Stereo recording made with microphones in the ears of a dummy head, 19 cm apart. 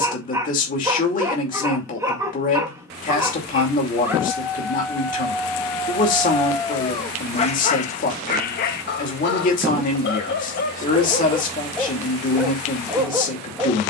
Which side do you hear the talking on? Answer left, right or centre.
left.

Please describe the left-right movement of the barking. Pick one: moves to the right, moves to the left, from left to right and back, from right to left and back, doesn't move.
from right to left and back.